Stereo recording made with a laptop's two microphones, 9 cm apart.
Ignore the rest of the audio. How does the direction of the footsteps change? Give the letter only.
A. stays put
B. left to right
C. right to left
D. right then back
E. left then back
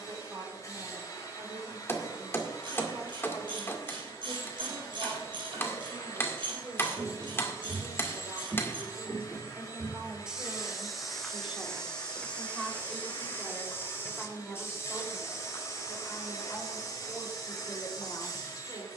C.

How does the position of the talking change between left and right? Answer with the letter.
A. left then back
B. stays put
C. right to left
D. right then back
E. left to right
C.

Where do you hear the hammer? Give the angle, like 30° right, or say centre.
30° left.